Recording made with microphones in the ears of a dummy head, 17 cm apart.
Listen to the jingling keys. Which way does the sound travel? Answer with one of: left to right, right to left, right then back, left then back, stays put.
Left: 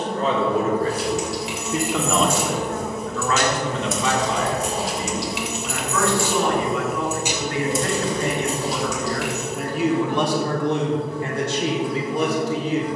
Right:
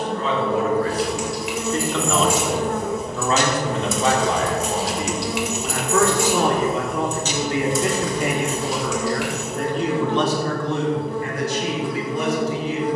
right then back.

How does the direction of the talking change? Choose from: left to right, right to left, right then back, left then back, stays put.
right then back.